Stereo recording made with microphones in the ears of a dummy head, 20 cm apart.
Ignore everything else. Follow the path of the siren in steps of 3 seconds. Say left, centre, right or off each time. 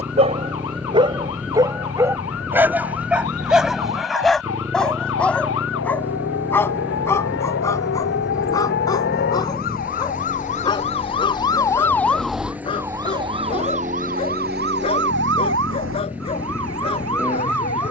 left, left, left, left, right, right.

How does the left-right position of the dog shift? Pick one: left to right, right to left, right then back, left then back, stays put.
right to left.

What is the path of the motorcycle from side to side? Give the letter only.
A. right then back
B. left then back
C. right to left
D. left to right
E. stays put
E.